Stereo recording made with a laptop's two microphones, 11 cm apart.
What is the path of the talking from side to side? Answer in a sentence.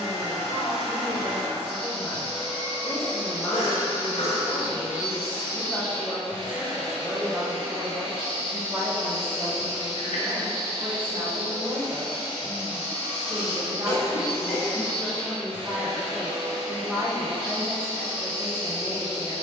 You can hear the talking move from left to right and back again.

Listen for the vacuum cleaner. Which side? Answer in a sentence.
In this clip you hear the vacuum cleaner on the right.